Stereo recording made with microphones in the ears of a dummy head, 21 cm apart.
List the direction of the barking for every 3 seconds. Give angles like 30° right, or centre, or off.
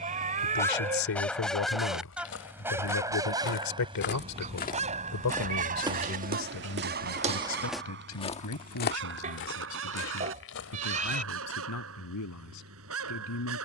centre, 30° right, 50° right, 60° right, 60° right.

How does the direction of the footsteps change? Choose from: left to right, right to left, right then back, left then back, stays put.
right then back.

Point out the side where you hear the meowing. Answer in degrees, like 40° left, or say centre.
30° right.